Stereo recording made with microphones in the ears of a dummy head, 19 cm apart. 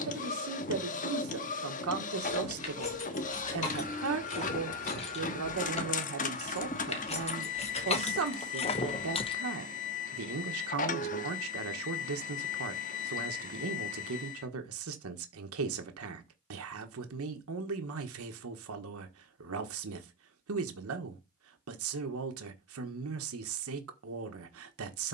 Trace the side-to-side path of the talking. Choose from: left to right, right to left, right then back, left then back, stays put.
stays put.